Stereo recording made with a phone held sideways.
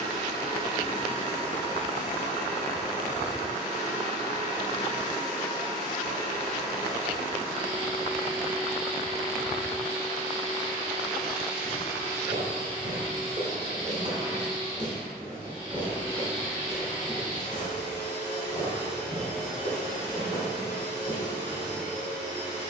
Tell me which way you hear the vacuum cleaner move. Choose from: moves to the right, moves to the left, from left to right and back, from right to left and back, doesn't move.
doesn't move.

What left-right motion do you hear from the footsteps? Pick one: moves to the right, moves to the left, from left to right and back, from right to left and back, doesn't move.
moves to the left.